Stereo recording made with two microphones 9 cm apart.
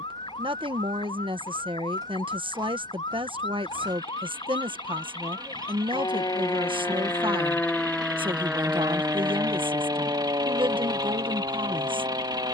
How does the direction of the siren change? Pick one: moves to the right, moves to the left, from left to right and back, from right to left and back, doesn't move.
moves to the right.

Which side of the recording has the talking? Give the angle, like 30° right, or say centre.
70° right.